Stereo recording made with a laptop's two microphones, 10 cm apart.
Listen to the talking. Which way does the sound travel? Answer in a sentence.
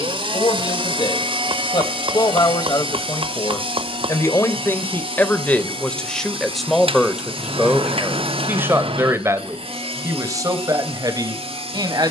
You can hear the talking move from left to right.